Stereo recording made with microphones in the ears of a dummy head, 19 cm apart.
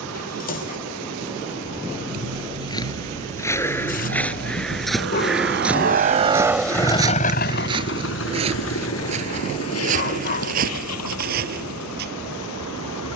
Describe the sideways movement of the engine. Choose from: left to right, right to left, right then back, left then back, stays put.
right to left.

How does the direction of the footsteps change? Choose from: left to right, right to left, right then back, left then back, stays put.
left to right.